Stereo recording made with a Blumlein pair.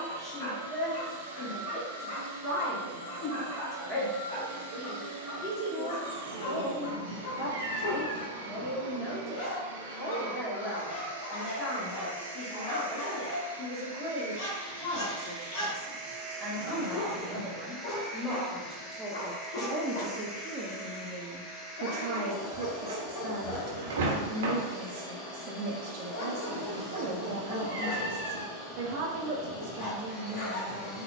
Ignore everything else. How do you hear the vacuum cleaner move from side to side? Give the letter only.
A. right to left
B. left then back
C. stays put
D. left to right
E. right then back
A.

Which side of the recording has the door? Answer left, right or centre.
right.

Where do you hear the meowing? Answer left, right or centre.
right.